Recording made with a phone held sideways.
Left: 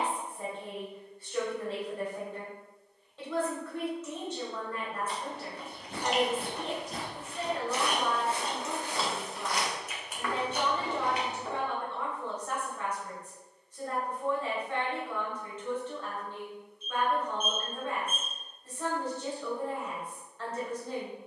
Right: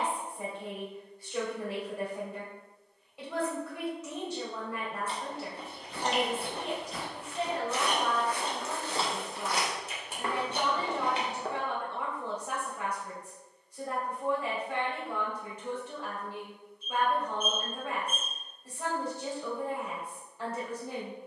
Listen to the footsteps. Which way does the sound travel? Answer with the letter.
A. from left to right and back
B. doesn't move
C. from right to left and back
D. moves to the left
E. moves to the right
E.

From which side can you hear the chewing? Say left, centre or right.
right.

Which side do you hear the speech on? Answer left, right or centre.
centre.